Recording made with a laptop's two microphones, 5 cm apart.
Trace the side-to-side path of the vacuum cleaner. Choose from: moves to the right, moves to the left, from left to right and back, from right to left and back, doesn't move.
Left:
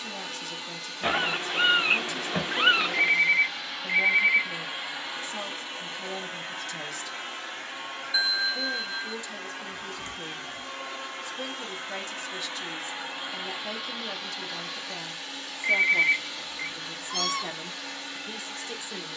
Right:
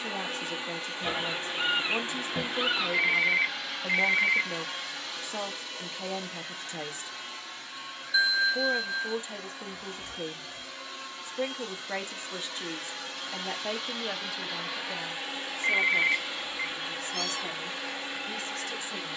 from right to left and back.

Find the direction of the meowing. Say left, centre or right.
left.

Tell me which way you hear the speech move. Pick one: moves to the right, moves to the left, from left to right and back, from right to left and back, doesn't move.
moves to the left.